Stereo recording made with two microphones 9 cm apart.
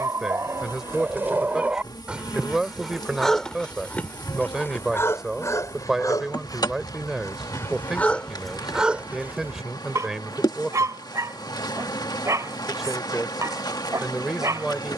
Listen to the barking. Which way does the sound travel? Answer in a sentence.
You can hear the barking go left and come back.